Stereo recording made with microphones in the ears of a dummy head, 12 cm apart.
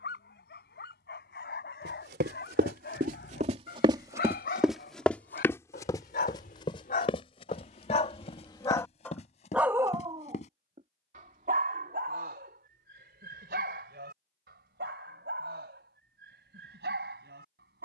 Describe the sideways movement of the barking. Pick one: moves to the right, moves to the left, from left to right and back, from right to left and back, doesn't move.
moves to the right.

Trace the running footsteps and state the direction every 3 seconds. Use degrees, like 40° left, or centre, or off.
70° right, 10° right, 40° left, 50° left, off, off.